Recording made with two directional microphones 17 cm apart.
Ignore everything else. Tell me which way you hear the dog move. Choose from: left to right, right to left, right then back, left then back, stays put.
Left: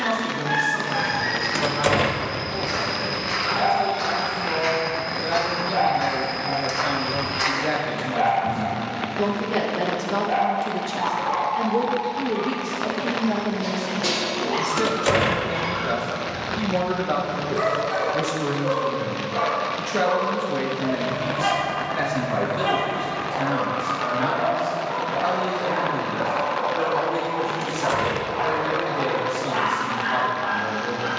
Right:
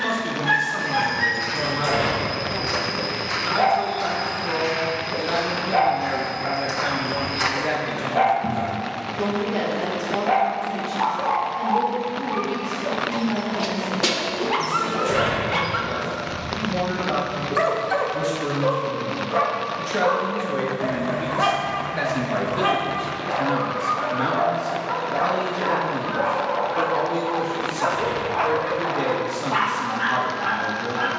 stays put.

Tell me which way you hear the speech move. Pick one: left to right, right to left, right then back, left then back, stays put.
left then back.